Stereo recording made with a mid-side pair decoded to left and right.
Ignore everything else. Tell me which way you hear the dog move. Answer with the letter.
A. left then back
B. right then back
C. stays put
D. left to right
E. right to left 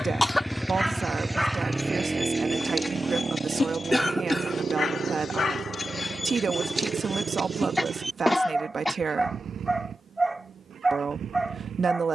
A.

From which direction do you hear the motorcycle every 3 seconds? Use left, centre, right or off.
centre, right, right, right.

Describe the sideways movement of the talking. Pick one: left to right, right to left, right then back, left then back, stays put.
stays put.